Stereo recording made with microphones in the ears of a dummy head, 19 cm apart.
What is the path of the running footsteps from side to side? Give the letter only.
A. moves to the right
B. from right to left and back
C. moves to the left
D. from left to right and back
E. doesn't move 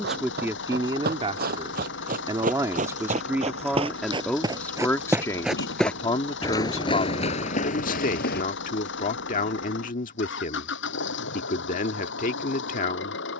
C.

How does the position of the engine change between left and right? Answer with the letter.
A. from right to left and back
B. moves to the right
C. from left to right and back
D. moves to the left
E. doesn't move
E.